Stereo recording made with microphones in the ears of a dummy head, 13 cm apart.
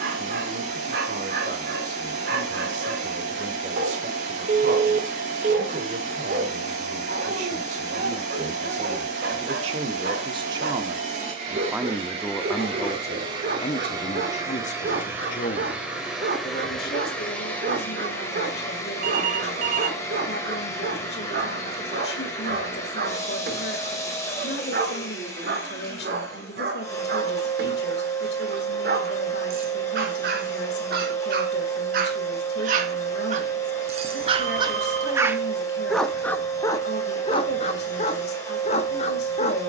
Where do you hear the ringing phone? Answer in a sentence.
In this clip you hear the ringing phone on the right.